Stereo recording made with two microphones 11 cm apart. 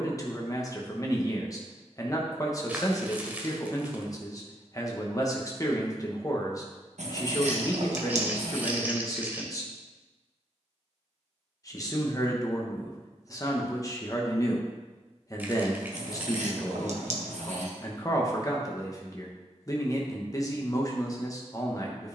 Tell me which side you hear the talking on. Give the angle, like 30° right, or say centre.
30° left.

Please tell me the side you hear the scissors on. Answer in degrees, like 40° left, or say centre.
70° right.